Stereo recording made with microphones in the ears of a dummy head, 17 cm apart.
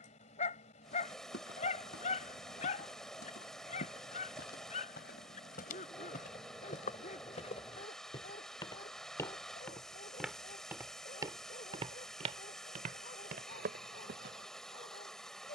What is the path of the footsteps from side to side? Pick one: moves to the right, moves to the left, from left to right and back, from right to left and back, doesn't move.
moves to the right.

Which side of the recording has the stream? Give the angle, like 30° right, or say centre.
centre.